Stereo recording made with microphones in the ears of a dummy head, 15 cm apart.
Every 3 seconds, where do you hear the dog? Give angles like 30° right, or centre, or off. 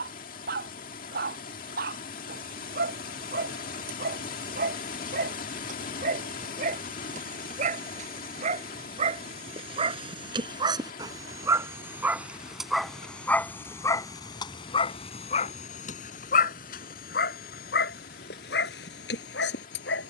60° right, 50° right, 50° right, 30° right, 10° left, 50° left, 70° left.